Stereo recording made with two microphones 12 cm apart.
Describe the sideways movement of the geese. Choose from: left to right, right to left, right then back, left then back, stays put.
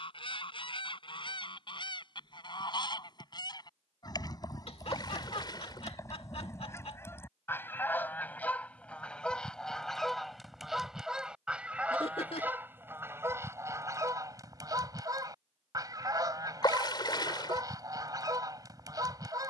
left to right.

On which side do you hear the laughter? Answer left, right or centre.
left.